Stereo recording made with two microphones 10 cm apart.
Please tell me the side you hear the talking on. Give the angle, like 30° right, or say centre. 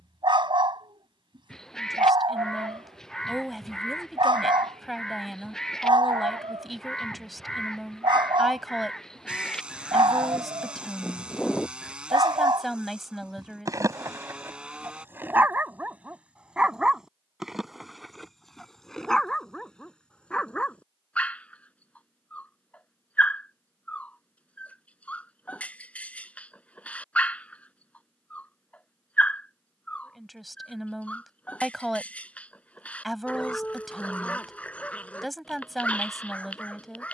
centre.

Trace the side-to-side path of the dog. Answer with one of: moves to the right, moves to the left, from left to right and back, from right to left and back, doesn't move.
moves to the left.